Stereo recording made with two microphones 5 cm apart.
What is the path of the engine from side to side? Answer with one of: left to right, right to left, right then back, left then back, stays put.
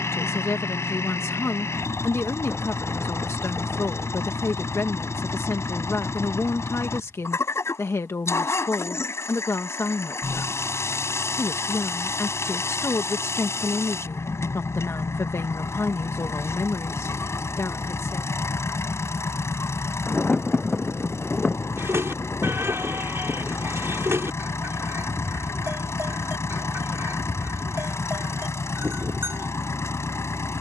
stays put.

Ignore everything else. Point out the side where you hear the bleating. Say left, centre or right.
right.